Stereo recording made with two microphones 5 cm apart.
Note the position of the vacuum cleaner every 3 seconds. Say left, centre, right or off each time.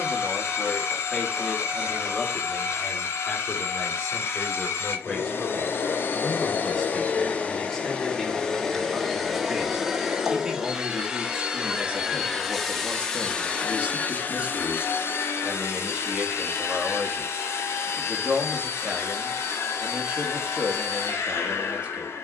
left, left, left, centre, left, left, left, left.